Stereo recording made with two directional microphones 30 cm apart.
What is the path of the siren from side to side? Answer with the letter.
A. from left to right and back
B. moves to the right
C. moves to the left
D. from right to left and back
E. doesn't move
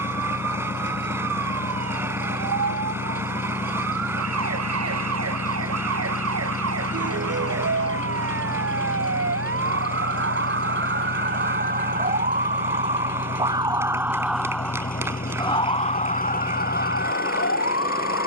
C.